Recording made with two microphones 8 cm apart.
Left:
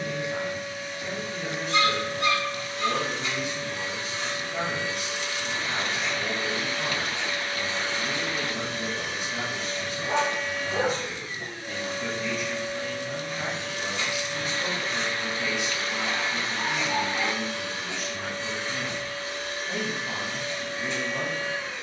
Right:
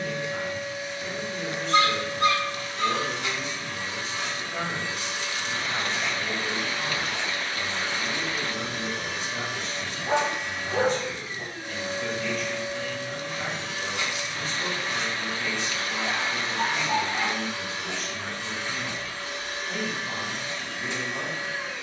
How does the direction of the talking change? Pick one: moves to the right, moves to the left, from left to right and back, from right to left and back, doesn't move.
doesn't move.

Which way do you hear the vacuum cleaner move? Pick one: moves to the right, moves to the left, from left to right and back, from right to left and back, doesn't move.
doesn't move.